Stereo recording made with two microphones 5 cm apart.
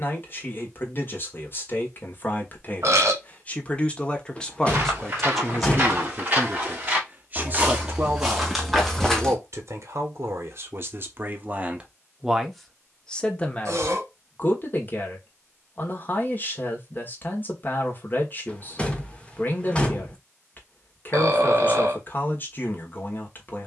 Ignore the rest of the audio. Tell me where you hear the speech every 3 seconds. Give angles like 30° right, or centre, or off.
40° left, 10° left, 30° right, 50° right, 20° left, 40° left, 40° left, 40° left.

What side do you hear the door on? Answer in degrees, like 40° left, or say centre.
20° left.